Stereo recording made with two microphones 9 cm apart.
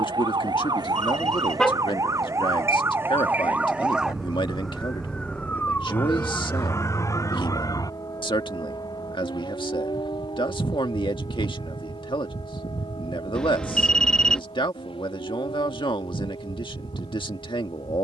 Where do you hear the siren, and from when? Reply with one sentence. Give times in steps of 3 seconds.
You can hear the siren on the right from 0 s, in the centre from 3 s and on the left from 6 s.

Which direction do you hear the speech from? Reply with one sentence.
In this clip you hear the speech on the left.